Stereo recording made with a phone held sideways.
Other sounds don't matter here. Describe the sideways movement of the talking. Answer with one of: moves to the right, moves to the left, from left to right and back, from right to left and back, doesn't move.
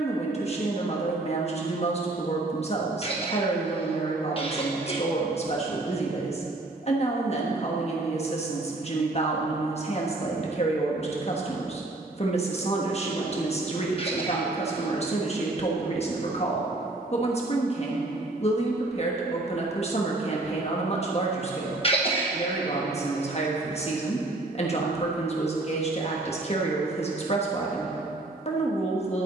doesn't move.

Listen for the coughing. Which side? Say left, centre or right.
left.